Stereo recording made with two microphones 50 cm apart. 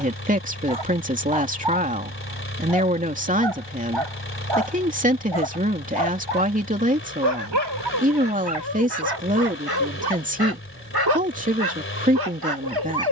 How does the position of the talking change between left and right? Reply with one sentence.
You can hear the talking stay in one place.